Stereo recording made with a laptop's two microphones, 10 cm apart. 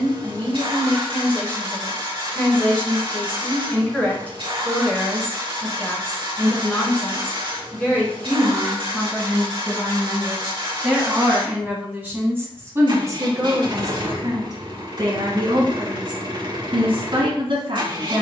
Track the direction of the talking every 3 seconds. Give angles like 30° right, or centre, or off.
20° left, 20° left, 10° left, centre, 30° right, 60° right.